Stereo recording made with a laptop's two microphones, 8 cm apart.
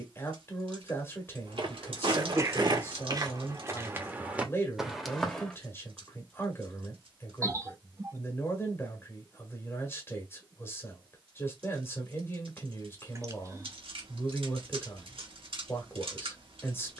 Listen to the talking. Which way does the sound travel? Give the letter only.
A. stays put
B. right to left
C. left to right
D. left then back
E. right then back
A.